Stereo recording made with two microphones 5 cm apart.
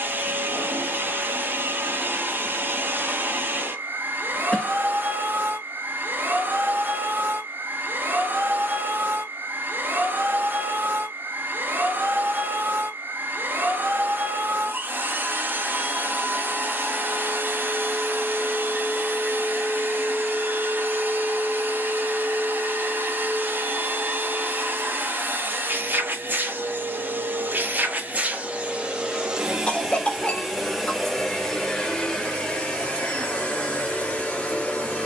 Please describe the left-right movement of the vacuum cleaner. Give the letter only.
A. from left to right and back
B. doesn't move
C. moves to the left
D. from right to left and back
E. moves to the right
C.